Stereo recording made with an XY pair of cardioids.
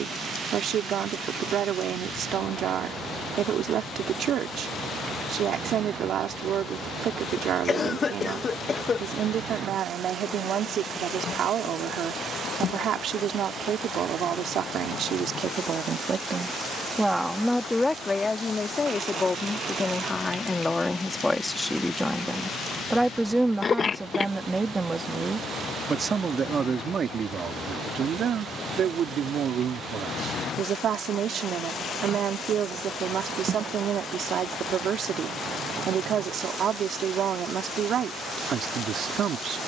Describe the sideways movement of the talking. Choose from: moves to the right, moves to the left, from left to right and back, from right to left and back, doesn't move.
from right to left and back.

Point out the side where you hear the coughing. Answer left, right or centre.
left.